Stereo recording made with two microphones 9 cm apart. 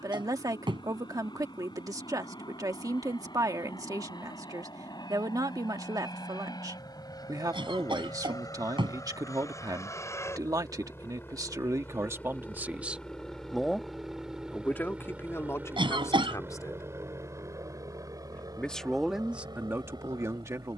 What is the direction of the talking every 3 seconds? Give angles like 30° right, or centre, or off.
40° right, 40° right, 40° right, 40° right, 10° right, 30° left, 20° right.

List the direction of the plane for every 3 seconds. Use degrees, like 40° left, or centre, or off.
70° left, 60° left, 50° left, 30° left, centre, 30° right, 40° right.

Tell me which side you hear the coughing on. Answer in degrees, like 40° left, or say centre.
70° right.